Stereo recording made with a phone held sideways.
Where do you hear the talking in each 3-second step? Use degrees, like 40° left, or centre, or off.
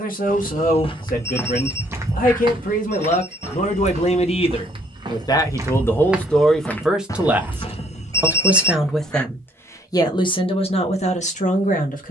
60° left, 30° left, centre, 30° left.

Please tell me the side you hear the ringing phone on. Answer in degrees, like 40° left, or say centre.
20° left.